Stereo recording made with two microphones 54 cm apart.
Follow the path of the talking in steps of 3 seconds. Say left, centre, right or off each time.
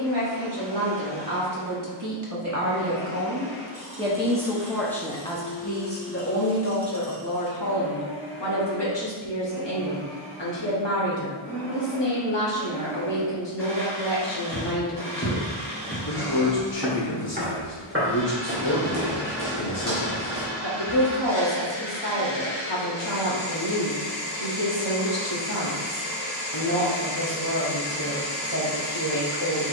right, centre, left, left, left, left, left, left, left, left.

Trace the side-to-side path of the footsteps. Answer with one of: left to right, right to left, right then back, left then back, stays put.
left to right.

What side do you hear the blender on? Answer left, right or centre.
left.